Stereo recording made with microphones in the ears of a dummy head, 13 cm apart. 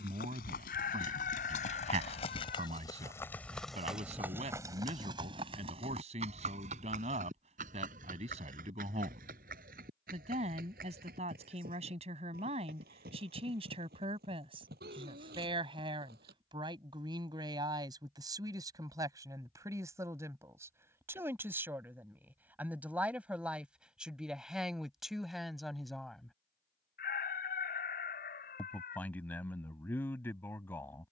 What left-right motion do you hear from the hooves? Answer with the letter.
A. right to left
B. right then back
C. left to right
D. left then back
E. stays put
C.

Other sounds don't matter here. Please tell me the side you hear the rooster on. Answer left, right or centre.
left.